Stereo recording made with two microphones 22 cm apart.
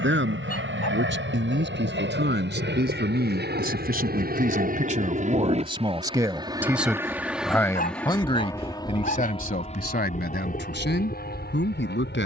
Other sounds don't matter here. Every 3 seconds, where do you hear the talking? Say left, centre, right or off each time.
right, right, centre, left.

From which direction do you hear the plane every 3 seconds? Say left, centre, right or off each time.
right, right, centre, left.